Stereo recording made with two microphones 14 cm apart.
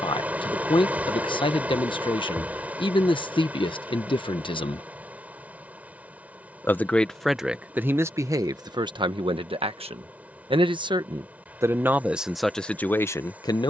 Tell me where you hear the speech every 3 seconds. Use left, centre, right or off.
left, left, centre, right, centre.